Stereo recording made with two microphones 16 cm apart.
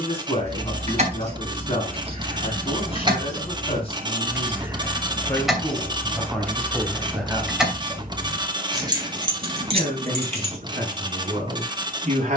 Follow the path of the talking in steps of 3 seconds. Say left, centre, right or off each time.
left, left, centre, right.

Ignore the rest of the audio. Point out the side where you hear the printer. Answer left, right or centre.
right.